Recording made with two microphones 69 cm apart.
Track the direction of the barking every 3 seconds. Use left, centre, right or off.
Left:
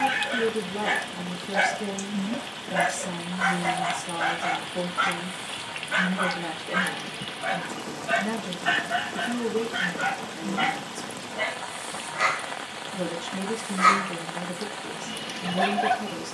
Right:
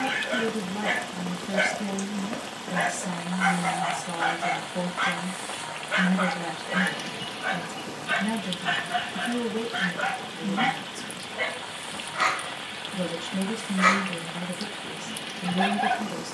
left, centre, right, right, right, centre.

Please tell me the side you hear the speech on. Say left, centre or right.
right.